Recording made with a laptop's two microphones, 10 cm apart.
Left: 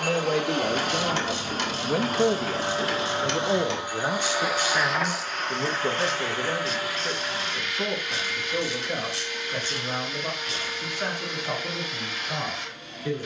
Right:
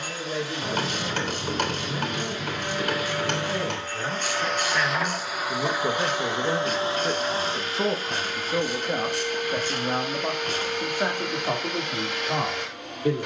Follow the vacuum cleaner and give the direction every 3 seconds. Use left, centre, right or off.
left, centre, right, right, right.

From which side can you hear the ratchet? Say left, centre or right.
right.